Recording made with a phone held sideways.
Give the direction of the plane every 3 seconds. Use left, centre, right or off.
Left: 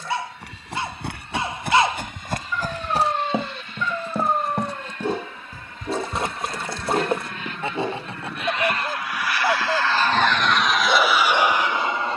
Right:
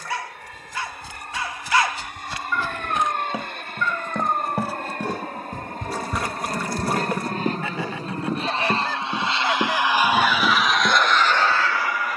right, right, right, centre.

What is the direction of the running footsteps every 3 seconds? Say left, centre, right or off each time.
left, centre, right, right.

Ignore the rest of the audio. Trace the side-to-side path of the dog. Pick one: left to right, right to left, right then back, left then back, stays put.
stays put.